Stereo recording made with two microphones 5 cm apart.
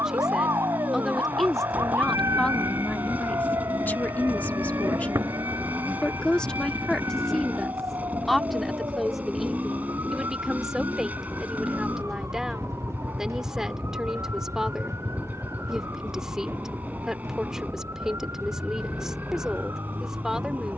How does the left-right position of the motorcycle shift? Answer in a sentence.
In this clip you hear the motorcycle stay put.